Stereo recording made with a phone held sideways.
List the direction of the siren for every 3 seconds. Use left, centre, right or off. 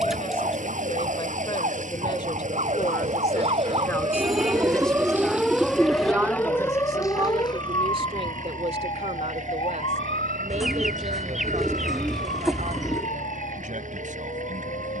right, right, left, left, left.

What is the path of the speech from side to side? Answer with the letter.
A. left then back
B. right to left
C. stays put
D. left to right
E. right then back
D.